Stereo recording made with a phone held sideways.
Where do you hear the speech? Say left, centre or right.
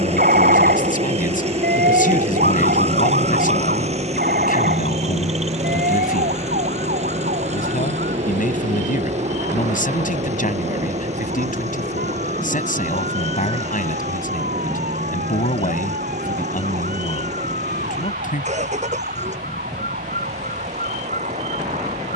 left.